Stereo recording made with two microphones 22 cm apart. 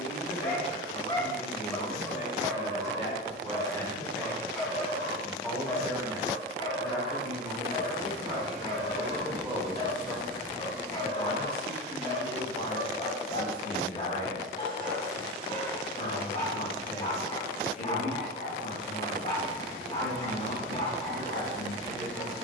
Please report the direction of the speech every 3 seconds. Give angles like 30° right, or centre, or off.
40° left, 10° left, 20° right, 10° left, 40° left, 40° left, 40° left, 40° left.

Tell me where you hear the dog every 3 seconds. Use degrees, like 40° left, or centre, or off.
centre, centre, 20° left, 20° left, 20° left, 20° left, 20° left, 20° left.